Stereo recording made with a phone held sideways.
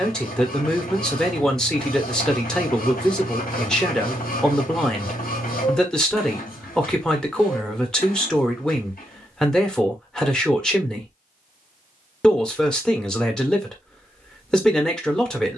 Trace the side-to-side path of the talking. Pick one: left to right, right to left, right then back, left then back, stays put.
stays put.